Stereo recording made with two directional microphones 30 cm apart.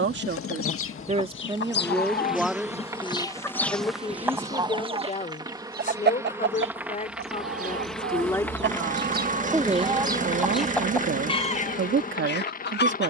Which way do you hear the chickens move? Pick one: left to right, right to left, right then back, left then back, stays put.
right then back.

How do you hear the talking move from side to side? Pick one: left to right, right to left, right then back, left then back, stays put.
left then back.